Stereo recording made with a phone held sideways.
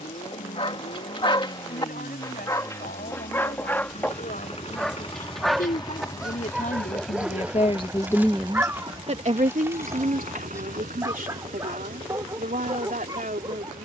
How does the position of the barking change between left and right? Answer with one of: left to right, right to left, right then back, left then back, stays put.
left to right.